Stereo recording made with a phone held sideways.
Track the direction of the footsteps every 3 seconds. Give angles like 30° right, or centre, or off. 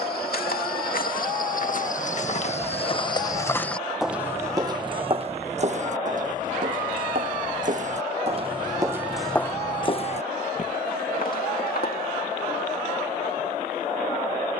60° left, 20° right, 50° right, 40° left, off.